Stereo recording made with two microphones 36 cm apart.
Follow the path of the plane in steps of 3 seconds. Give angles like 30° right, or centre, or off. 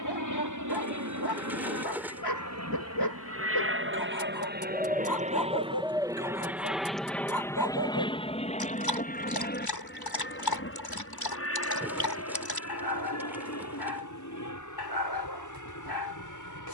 50° right, 30° right, 10° left, 30° left, 40° left, 50° left.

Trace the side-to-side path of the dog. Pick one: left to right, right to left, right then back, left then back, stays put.
stays put.